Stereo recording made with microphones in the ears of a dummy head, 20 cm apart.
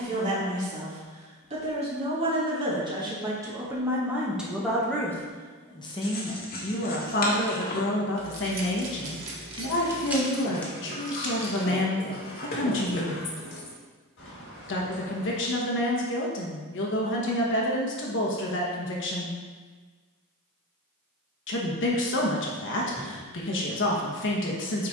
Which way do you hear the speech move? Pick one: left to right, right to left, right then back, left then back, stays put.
right to left.